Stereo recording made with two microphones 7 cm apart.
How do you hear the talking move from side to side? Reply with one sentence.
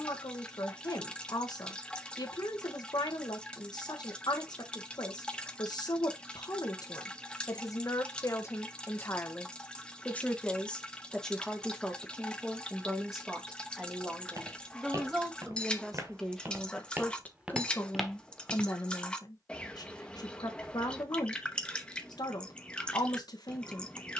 You can hear the talking go right and come back.